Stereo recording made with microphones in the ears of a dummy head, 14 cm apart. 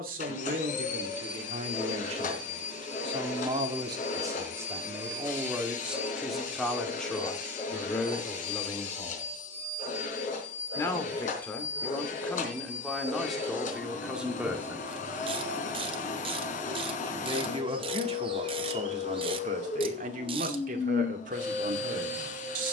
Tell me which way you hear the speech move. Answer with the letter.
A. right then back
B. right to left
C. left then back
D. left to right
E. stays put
C.